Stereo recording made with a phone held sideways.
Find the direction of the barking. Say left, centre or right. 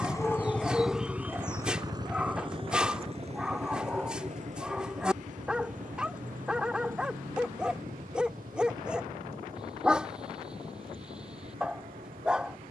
centre.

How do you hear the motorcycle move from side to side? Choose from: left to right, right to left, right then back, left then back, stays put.
left to right.